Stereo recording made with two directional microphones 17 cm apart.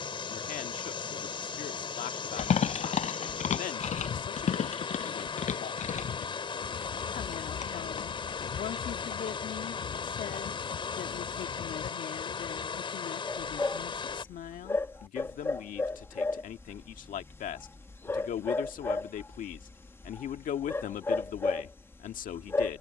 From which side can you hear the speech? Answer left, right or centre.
left.